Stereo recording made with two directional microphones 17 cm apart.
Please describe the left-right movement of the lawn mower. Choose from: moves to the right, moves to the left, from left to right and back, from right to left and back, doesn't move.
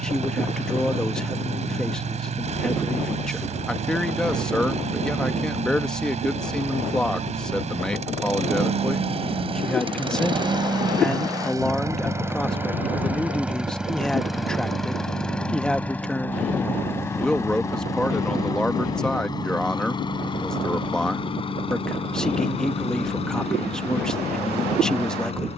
moves to the left.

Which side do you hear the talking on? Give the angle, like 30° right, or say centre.
centre.